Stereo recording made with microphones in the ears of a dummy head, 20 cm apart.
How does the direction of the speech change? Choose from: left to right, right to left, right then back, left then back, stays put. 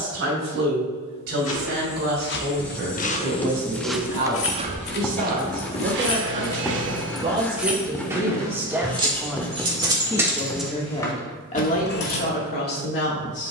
right to left.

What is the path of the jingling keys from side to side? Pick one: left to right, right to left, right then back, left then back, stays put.
right then back.